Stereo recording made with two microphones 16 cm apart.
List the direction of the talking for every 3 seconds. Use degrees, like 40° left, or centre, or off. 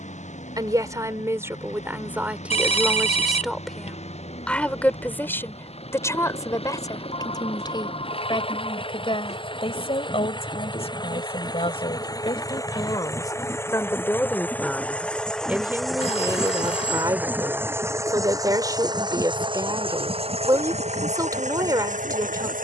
10° right, 10° left, 30° left, 40° left, 20° left, 20° right, 20° right, 20° right.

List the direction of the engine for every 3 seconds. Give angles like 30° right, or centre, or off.
50° left, 40° left, 40° left, 30° left, 20° left, centre, 30° right, 50° right.